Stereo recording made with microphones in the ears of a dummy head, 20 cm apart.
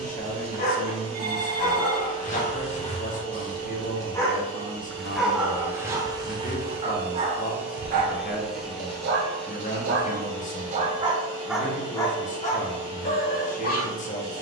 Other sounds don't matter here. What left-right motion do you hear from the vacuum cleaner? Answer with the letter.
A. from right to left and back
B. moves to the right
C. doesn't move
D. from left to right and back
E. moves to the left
E.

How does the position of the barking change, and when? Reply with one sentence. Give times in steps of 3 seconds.
You can hear the barking on the left from 0 s, in the centre from 3 s, on the right from 6 s and on the left from 12 s.